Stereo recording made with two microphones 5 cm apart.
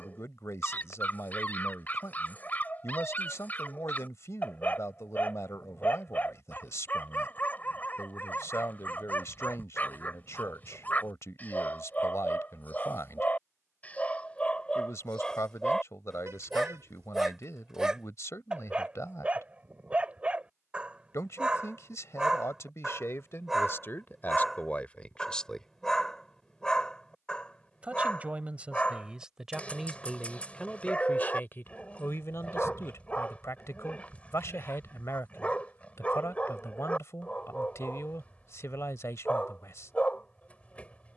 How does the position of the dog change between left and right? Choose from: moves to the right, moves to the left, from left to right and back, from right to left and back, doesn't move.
from left to right and back.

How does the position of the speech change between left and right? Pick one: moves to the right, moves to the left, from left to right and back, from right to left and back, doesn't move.
from left to right and back.